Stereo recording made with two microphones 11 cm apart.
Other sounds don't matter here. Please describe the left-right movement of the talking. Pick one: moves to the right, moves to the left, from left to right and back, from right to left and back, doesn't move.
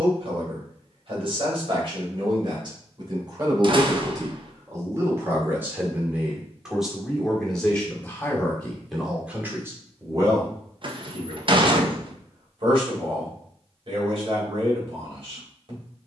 from right to left and back.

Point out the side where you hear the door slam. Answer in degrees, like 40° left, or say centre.
50° right.